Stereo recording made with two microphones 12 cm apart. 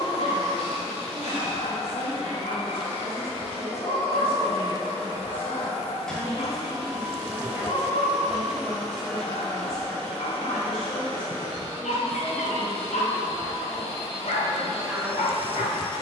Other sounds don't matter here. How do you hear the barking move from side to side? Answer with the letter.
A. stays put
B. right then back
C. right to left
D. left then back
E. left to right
A.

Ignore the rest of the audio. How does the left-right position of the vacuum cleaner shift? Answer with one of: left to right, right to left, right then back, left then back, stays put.
right then back.